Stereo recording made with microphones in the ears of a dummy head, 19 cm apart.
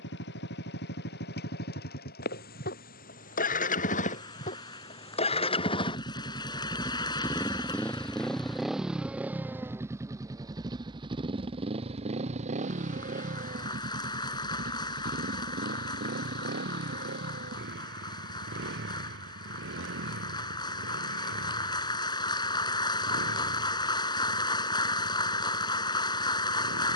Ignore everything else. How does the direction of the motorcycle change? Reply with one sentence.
In this clip you hear the motorcycle go from the left side to the right.